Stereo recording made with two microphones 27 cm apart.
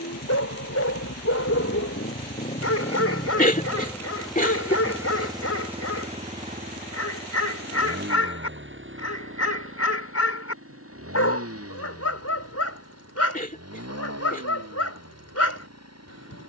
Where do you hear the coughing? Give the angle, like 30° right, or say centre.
30° left.